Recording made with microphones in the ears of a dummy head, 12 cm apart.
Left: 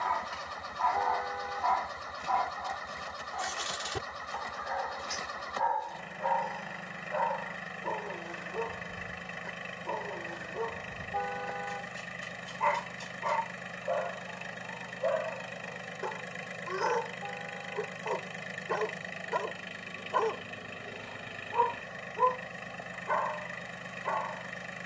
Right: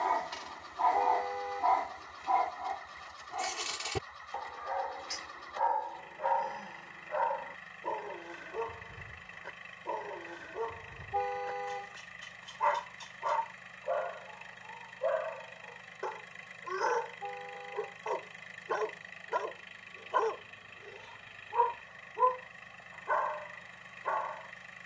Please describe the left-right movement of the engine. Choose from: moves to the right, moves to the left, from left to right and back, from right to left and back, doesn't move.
doesn't move.